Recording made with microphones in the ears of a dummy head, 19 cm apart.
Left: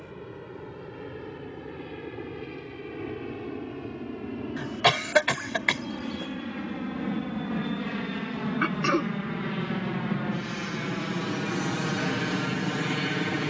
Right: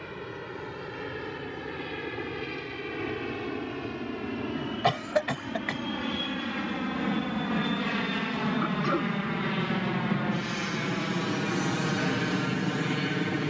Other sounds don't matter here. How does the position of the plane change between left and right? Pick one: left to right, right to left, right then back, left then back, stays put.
right to left.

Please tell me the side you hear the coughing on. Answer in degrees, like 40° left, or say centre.
70° left.